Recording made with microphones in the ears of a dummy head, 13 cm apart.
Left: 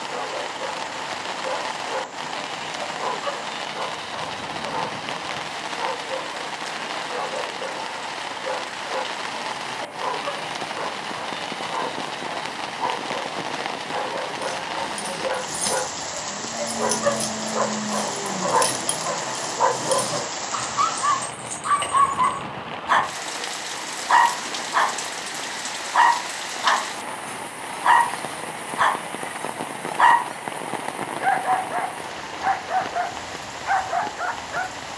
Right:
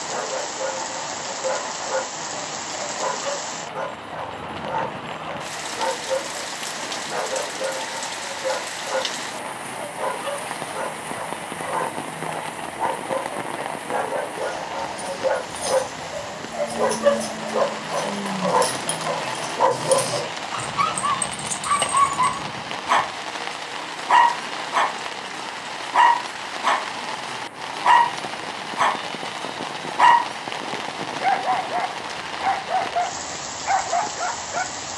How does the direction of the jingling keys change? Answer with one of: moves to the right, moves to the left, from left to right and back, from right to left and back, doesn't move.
moves to the right.